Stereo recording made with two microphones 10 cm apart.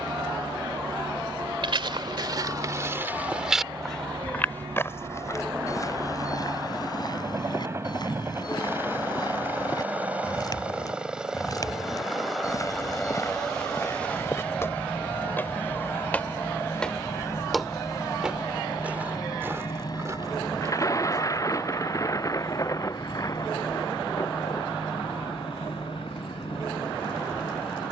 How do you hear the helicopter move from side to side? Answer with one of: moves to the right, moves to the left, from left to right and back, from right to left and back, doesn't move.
moves to the left.